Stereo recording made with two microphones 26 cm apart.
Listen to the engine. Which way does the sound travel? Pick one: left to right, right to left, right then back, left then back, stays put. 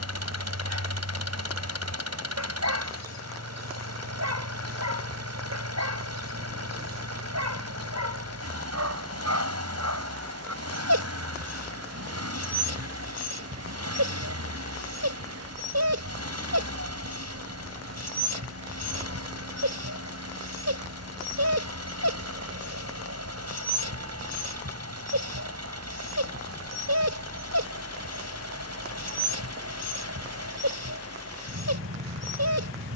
stays put.